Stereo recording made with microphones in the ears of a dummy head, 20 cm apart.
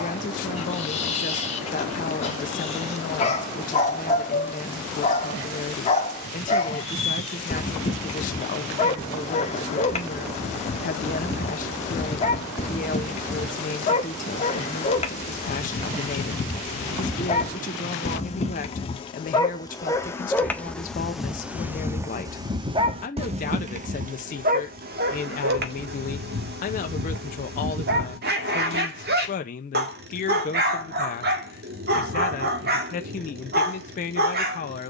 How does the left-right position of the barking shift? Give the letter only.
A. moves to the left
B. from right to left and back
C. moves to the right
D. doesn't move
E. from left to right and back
C.